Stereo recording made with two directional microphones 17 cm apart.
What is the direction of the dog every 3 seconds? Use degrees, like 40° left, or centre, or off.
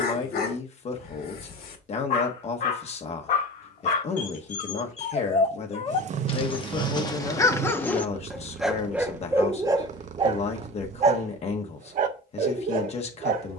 60° left, 50° left, 20° left, 30° right, 60° right.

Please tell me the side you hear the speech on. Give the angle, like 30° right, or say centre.
40° left.